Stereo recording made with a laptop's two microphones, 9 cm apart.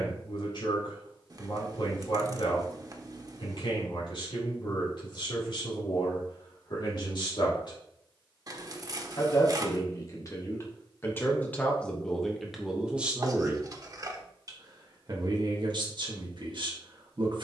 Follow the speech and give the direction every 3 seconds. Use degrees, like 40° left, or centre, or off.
60° left, 60° left, 60° left, 30° left, 10° right, 60° right.